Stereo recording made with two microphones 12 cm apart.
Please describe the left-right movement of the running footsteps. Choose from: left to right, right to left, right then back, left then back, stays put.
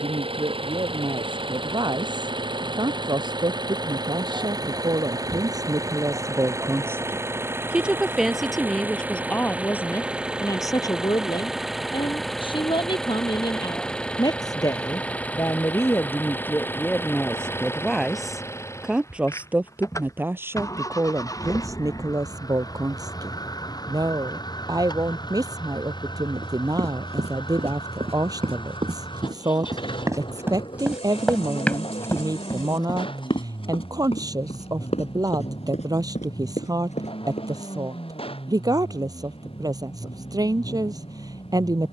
right to left.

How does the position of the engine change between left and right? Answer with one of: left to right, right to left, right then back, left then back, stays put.
right to left.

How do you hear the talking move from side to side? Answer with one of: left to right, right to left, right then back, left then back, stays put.
left then back.